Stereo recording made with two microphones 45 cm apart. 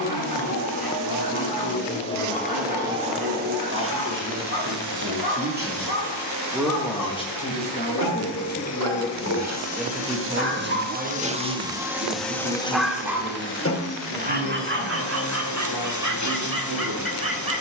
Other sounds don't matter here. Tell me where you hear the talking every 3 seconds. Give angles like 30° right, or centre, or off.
50° right, 30° right, 20° left, 10° right, 40° right, 50° right.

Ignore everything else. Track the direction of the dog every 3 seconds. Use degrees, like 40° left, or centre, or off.
50° left, 50° left, 50° left, 30° left, 10° right, 40° right.